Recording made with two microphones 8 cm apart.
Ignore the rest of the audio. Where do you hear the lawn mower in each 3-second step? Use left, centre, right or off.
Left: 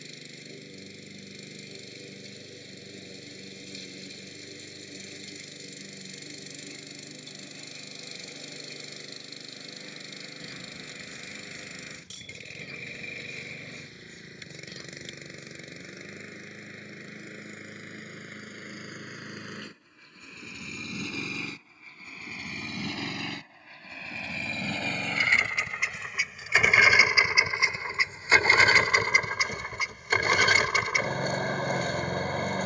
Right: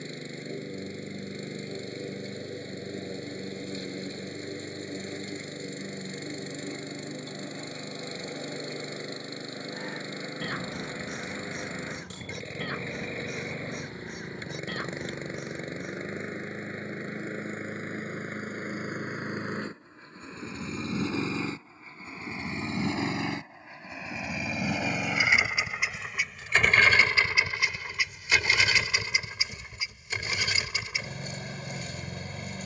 right, right, right, right, right, right, right, right, centre, left, left.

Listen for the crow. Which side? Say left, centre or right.
right.